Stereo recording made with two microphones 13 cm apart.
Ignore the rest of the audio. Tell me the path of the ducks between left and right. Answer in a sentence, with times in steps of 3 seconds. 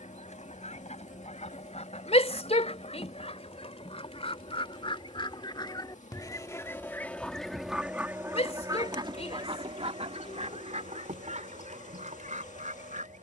You can hear the ducks on the left from 0 s, in the centre from 6 s and on the right from 9 s.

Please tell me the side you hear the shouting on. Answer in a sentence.
You can hear the shouting on the left.